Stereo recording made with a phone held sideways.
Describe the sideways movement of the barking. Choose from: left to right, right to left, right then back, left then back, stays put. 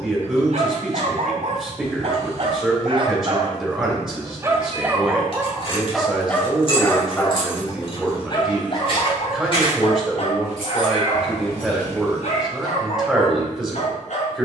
right to left.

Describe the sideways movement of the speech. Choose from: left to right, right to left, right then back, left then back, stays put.
stays put.